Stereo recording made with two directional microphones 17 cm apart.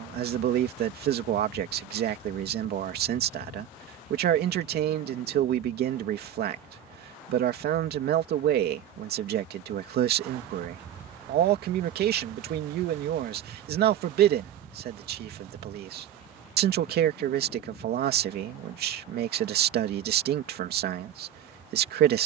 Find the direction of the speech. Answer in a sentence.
You can hear the speech on the right.